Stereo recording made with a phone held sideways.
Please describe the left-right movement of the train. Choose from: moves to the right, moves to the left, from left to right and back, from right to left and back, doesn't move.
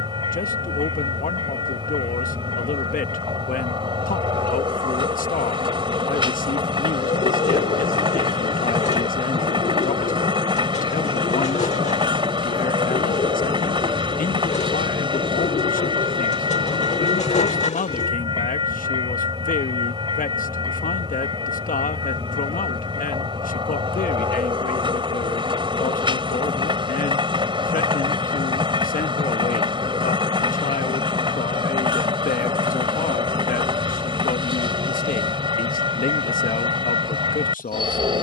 doesn't move.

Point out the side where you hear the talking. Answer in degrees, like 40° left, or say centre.
80° left.